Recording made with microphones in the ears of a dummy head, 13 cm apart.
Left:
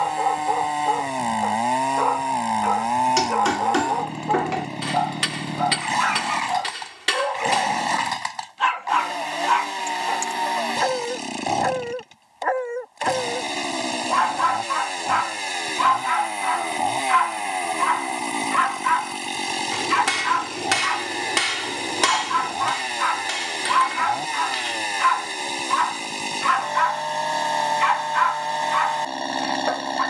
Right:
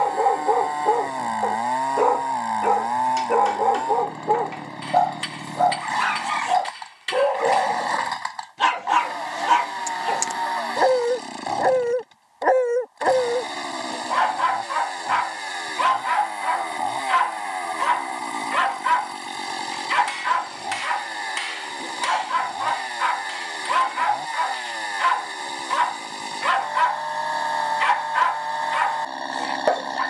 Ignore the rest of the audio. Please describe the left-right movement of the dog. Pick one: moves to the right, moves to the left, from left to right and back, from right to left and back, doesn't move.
doesn't move.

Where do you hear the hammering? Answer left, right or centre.
left.